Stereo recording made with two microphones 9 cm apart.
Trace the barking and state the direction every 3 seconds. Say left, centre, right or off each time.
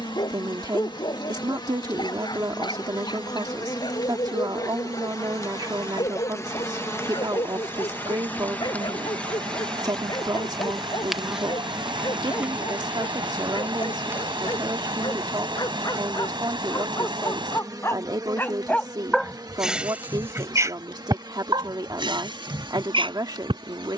left, left, left, left, left, left, centre, right.